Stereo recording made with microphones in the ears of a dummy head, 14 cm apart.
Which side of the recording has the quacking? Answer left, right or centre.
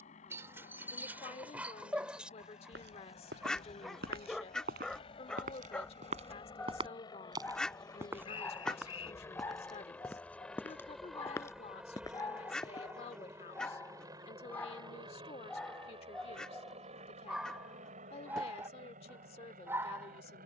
centre.